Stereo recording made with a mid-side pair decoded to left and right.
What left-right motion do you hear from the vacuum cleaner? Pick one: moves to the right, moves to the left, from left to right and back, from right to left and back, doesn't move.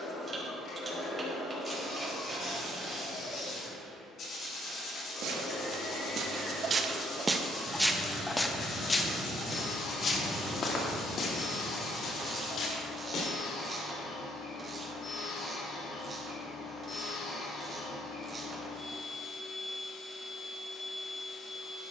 doesn't move.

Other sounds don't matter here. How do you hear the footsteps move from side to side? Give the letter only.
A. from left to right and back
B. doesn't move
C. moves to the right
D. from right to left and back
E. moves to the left
E.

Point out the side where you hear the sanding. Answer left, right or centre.
left.